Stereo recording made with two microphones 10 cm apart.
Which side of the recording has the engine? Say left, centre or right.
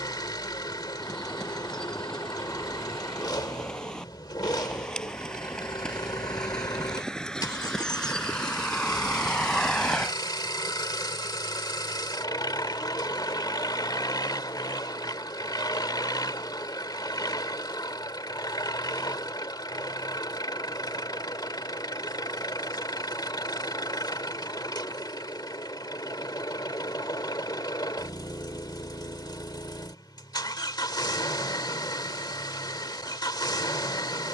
left.